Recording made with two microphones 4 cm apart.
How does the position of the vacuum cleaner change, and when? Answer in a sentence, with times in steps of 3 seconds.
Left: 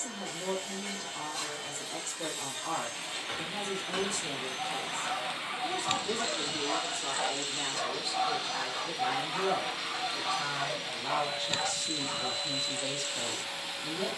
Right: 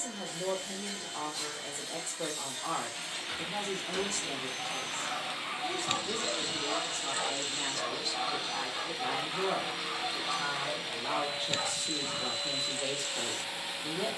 In this clip you hear the vacuum cleaner on the left from 0 s and in the centre from 6 s.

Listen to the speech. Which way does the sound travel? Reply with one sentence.
You can hear the speech go left and come back.